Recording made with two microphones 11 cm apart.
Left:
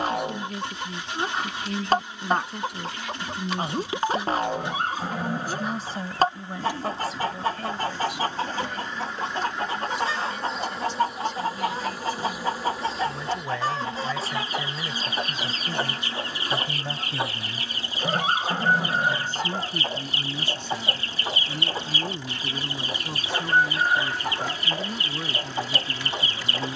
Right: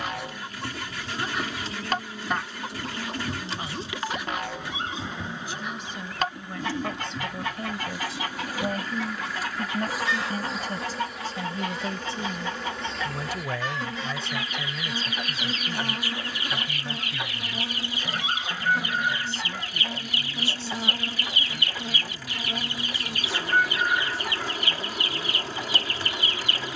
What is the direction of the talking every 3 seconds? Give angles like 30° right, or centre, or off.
60° left, 50° left, centre, 40° right, 10° right, 30° left, 50° left, 60° left, 60° left.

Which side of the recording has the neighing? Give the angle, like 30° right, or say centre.
50° left.